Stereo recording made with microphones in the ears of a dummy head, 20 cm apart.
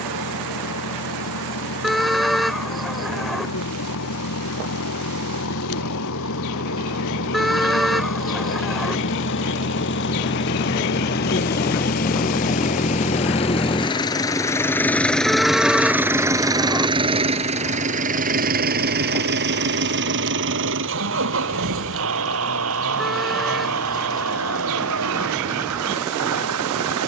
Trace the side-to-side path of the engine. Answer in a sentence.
You can hear the engine travel towards the right.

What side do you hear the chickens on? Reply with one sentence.
You can hear the chickens in the centre.